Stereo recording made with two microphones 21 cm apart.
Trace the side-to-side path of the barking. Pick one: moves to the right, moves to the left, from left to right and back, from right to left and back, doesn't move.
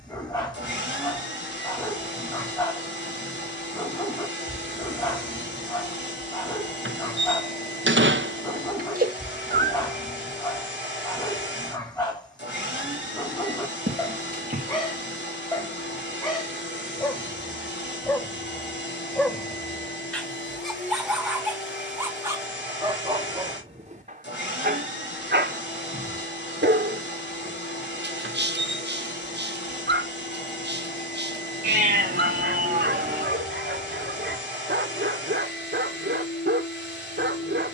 moves to the right.